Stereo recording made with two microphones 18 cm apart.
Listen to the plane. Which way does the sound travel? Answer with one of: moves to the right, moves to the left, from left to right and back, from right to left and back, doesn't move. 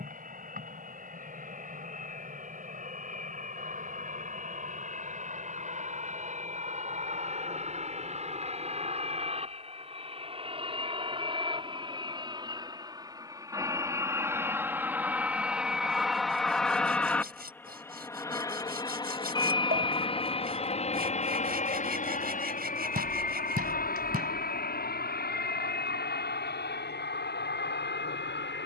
moves to the left.